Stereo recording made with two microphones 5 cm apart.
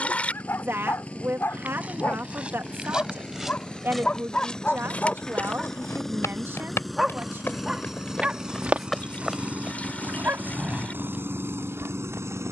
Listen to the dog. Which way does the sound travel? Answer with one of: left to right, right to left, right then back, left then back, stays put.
left to right.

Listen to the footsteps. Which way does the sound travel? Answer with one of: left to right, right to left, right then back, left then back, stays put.
left then back.